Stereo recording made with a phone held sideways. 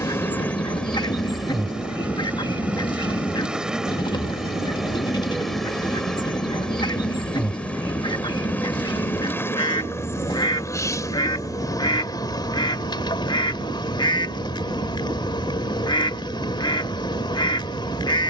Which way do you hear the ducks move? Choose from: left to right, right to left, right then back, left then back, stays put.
stays put.